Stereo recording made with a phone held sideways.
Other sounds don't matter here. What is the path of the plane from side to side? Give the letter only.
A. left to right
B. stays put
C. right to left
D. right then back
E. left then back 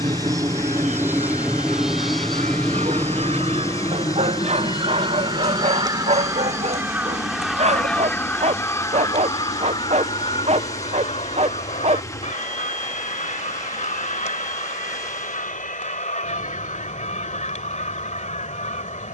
C.